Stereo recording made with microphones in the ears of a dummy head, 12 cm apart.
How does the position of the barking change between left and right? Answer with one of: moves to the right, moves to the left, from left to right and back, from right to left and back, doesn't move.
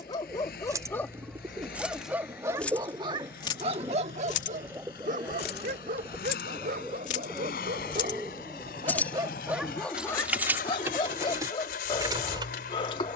from left to right and back.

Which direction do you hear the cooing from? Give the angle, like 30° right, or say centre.
20° right.